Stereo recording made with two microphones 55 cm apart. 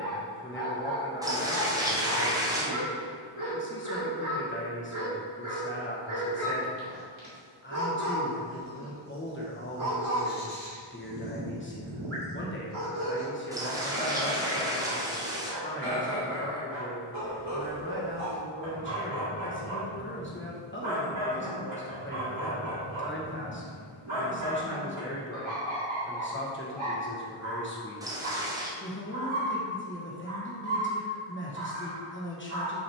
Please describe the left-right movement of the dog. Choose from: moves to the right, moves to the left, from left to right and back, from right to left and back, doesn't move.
doesn't move.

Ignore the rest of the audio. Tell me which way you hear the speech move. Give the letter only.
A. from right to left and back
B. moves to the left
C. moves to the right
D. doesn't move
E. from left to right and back
D.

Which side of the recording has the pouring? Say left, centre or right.
centre.